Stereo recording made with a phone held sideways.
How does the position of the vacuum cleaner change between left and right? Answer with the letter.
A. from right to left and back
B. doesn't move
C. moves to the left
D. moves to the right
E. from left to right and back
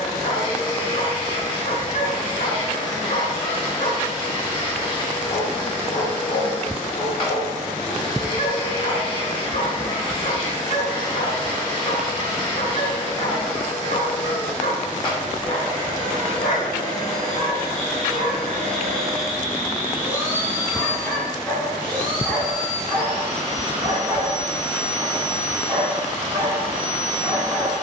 D.